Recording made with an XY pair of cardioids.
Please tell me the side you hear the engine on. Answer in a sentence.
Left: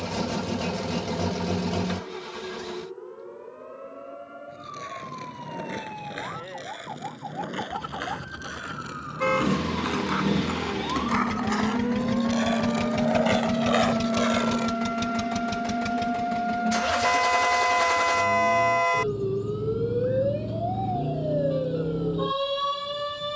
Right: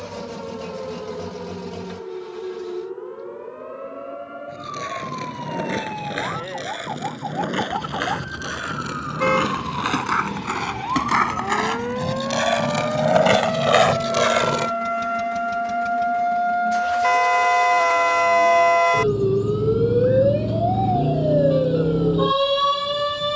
In this clip you hear the engine on the left.